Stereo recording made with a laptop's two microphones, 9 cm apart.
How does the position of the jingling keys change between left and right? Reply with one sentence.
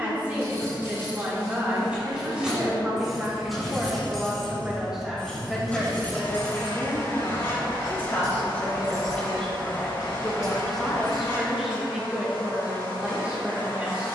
In this clip you hear the jingling keys travel towards the left.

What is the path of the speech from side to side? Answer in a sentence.
In this clip you hear the speech go left and come back.